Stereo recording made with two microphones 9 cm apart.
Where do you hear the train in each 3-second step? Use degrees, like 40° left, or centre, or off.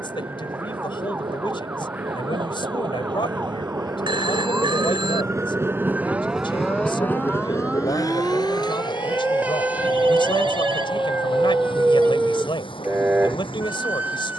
70° right, 50° right, 30° left, 70° left, 80° left.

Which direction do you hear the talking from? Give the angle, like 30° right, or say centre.
70° left.